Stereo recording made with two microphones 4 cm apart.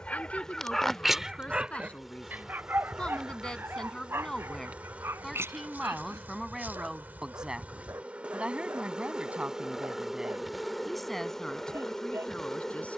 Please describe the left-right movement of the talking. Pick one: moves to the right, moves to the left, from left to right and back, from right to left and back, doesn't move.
from left to right and back.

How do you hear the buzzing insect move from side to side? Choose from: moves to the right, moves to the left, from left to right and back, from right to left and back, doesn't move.
from left to right and back.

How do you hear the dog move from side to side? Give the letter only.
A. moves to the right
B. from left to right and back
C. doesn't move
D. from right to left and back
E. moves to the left
A.